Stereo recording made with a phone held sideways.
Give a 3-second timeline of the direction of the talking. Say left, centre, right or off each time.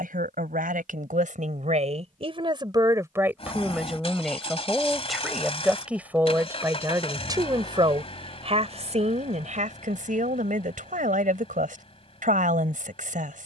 right, centre, right, right, right.